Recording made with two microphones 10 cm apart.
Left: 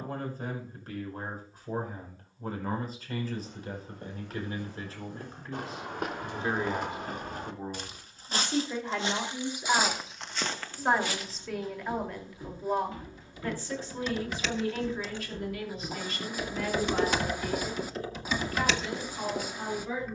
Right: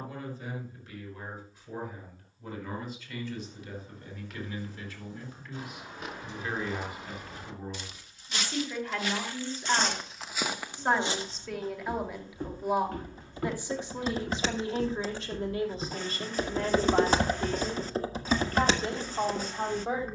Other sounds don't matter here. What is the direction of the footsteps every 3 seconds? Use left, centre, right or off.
off, left, left, centre, right, right, off.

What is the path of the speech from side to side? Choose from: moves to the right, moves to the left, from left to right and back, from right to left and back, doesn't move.
moves to the right.